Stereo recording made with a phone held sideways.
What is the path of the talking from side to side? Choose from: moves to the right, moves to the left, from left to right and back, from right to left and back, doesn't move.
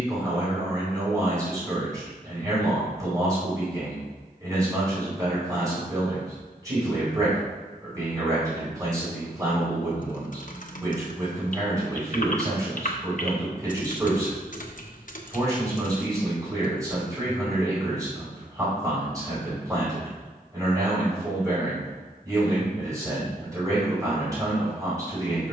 doesn't move.